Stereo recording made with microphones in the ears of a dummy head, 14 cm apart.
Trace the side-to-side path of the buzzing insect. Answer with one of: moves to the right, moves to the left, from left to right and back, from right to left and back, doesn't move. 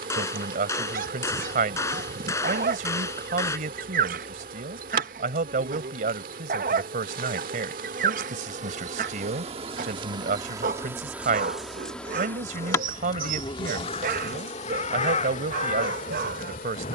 moves to the left.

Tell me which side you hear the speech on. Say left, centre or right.
right.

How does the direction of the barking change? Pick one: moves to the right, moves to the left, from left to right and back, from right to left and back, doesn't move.
doesn't move.